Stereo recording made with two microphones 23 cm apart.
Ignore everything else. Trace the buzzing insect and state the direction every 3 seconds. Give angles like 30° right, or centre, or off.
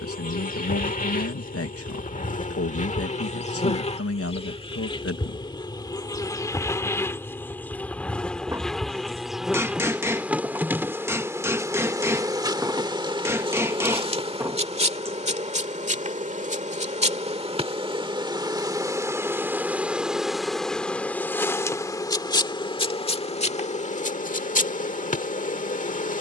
40° left, 20° left, 10° left, 10° right, 20° right, 30° right, 10° right, 20° left, 30° left.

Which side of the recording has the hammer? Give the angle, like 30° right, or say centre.
10° right.